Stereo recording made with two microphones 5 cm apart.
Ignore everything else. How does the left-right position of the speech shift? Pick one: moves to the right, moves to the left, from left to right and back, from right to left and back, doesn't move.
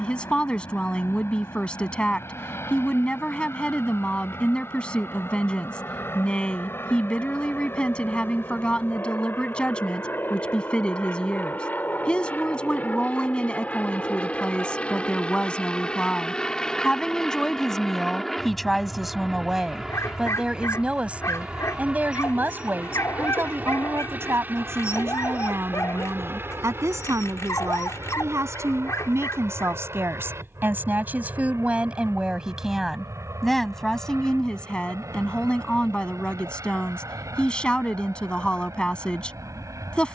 from left to right and back.